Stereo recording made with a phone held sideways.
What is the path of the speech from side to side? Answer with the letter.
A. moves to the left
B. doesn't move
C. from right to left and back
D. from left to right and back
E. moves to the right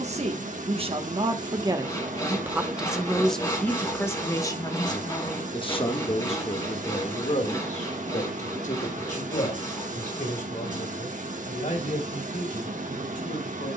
A.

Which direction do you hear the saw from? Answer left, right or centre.
left.